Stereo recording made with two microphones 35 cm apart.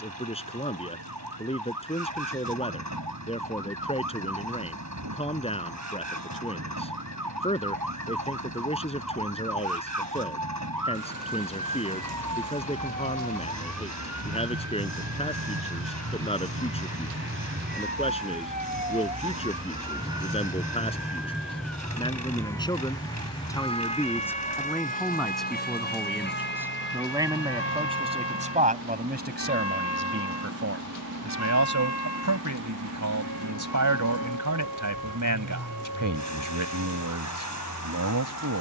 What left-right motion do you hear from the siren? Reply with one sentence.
In this clip you hear the siren go from the right side to the left.